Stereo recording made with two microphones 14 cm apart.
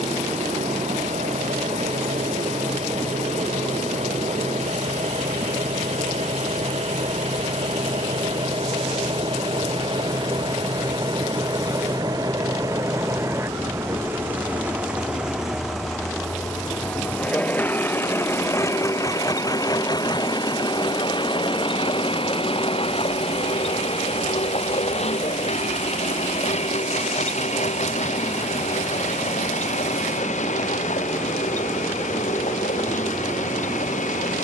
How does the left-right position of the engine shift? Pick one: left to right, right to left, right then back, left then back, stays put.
right to left.